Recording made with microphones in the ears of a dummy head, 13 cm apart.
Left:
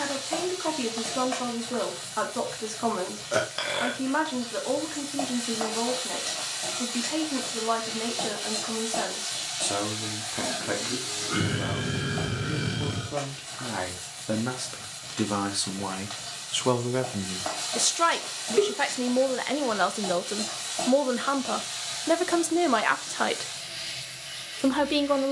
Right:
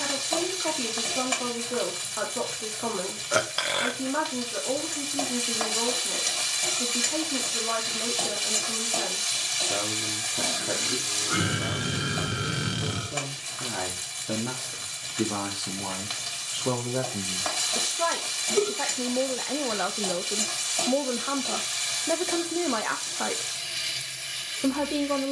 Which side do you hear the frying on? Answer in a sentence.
You can hear the frying on the right.